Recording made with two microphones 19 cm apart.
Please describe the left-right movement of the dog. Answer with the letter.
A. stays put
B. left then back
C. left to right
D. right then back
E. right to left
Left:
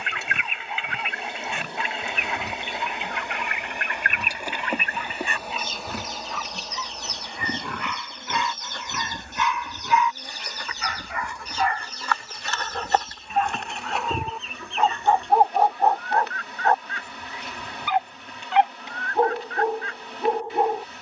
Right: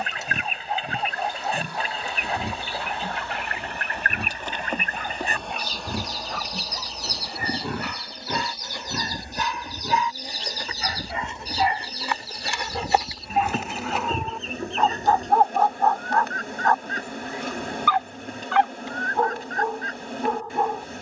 E.